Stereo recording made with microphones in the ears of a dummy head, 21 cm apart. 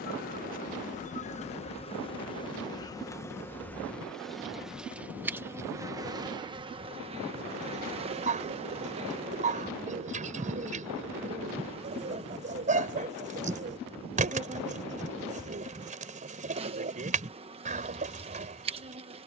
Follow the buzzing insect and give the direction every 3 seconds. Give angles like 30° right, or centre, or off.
30° left, centre, 20° right, 20° right, 20° right, 20° right, 20° right.